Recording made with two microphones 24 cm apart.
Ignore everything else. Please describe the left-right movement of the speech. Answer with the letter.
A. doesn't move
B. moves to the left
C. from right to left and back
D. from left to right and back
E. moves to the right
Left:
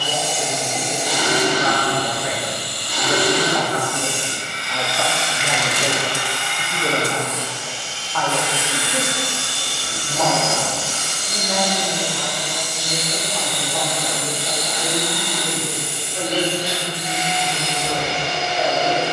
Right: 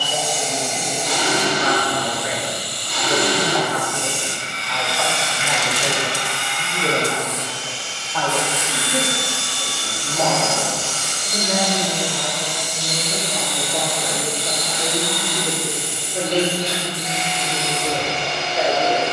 E.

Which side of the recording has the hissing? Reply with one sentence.
In this clip you hear the hissing on the left.